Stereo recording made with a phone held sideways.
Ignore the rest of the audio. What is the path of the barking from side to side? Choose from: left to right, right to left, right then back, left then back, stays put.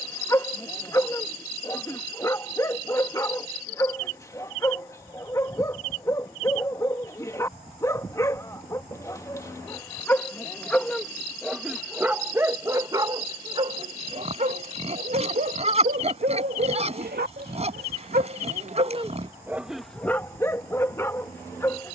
right then back.